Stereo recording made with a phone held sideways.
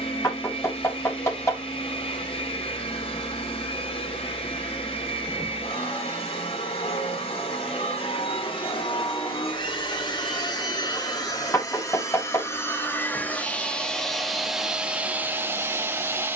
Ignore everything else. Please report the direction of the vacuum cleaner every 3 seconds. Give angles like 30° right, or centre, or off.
40° left, 40° left, 40° left, 30° left, 10° left, 10° right.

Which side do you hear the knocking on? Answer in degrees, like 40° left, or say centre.
20° left.